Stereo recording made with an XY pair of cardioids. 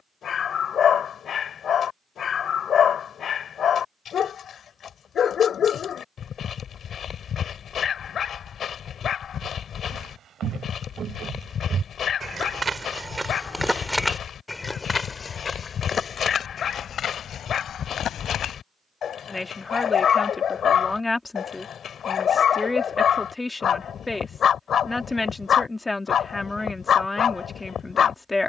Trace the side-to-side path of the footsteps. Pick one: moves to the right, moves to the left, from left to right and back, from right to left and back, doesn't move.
moves to the left.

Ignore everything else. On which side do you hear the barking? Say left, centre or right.
left.